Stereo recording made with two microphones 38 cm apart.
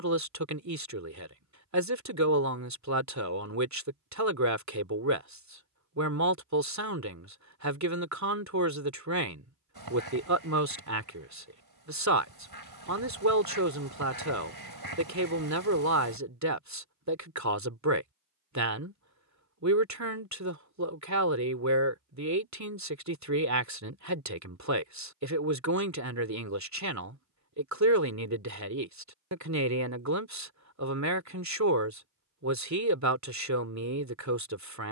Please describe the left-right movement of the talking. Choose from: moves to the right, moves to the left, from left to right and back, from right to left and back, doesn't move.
doesn't move.